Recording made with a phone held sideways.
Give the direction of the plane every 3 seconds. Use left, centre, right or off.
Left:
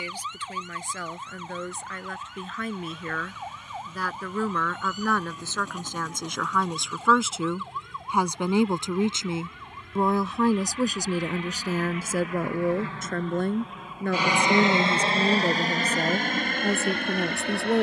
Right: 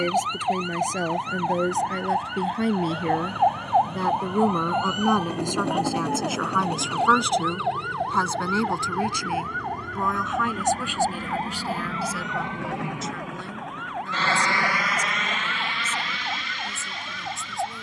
right, right, right, right, centre, left.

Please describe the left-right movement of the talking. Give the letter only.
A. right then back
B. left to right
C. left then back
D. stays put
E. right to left
E.